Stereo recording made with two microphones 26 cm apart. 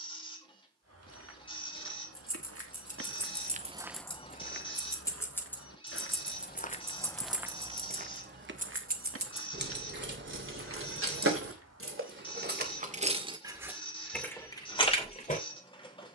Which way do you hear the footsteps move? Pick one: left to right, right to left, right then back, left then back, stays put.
left then back.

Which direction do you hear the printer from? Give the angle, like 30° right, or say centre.
20° left.